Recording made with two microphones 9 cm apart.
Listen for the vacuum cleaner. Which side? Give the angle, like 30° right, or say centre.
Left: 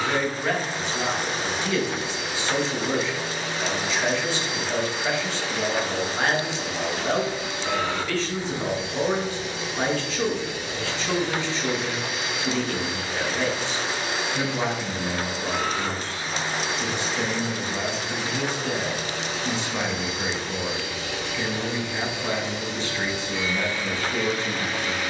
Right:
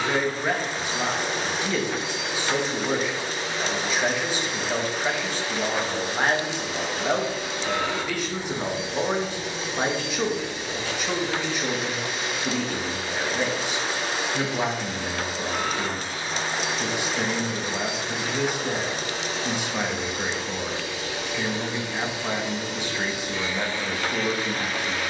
30° right.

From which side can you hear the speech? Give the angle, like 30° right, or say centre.
10° right.